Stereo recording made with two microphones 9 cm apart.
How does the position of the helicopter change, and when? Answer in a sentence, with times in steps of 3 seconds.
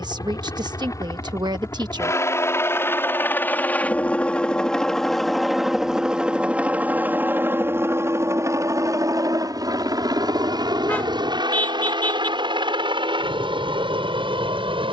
You can hear the helicopter on the left from 0 s, in the centre from 3 s and on the right from 6 s.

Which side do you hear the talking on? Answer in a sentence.
In this clip you hear the talking on the right.